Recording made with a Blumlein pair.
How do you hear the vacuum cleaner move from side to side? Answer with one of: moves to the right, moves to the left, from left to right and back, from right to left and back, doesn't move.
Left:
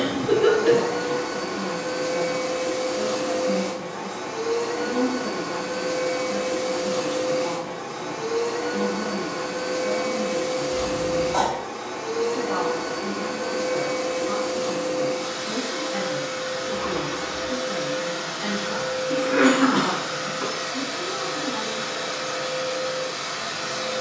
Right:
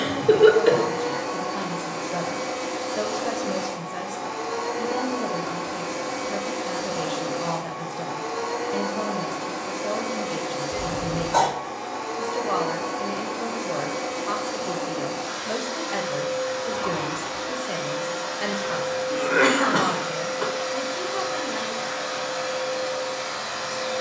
doesn't move.